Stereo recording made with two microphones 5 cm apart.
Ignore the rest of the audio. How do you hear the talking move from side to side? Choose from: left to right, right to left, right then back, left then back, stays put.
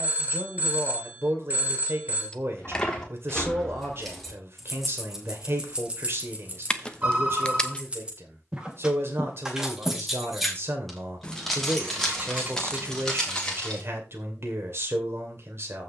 stays put.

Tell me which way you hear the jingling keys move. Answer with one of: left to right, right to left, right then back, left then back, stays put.
right then back.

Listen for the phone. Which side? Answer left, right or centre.
right.